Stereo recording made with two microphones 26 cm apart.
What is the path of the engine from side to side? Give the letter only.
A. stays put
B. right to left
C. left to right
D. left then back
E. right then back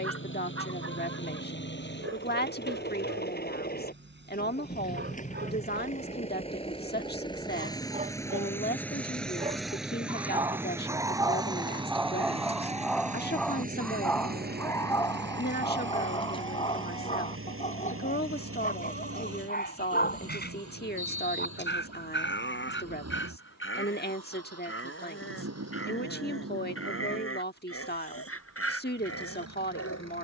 C.